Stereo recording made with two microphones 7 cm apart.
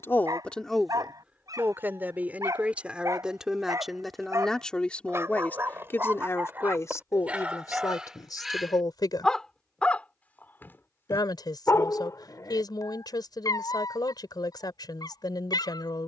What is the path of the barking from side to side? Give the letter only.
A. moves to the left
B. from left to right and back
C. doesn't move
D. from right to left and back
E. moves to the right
A.